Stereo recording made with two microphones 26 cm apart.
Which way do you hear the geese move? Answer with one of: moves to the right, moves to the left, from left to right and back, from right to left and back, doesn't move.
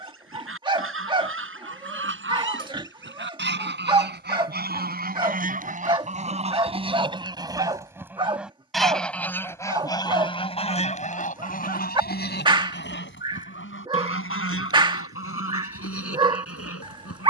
moves to the left.